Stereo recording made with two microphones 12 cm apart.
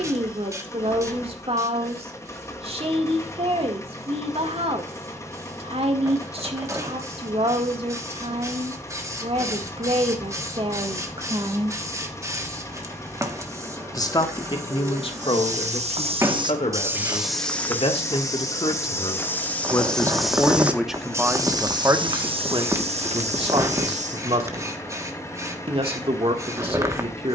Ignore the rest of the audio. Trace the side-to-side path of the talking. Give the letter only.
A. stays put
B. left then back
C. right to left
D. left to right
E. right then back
B.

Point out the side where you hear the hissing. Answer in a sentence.
In this clip you hear the hissing on the right.